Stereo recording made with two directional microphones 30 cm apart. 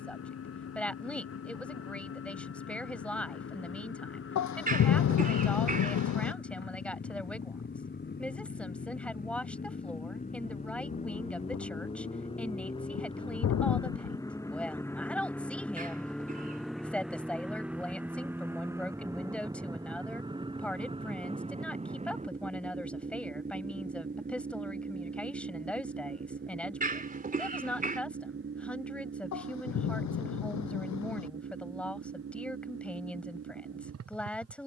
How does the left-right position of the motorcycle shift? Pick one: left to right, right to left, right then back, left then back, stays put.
left to right.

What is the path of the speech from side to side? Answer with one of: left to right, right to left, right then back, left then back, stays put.
stays put.